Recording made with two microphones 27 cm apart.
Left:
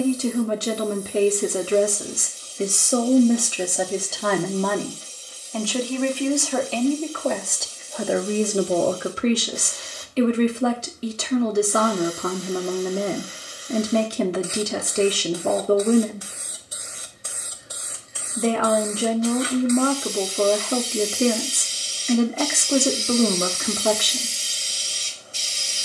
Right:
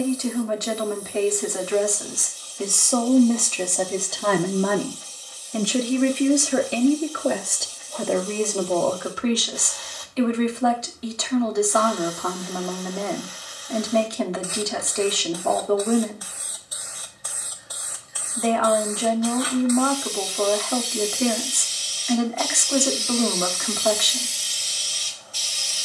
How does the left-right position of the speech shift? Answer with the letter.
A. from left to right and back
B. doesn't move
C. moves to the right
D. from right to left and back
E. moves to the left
A.